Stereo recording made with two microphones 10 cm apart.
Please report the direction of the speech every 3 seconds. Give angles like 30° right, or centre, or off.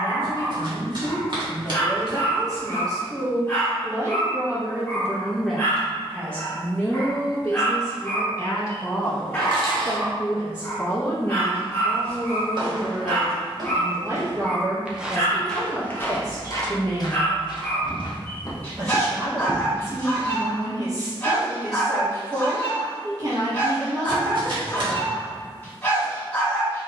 40° right, 20° right, 30° left, 20° left, 20° right, 40° right, 40° right, 40° right, 40° right.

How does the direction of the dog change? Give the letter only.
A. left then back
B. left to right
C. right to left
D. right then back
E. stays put
E.